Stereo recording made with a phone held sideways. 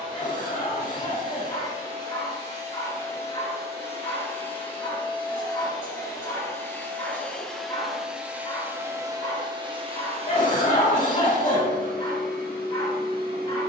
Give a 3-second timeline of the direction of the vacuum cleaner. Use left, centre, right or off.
left, left, centre, right, right.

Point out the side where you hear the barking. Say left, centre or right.
left.